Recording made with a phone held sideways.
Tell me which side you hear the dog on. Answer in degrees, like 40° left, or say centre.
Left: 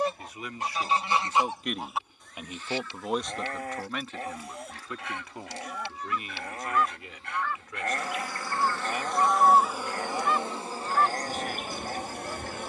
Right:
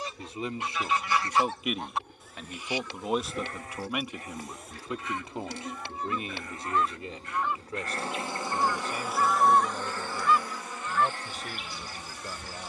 70° left.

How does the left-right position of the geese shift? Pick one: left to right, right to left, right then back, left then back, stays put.
right then back.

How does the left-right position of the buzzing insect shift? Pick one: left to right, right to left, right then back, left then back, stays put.
right to left.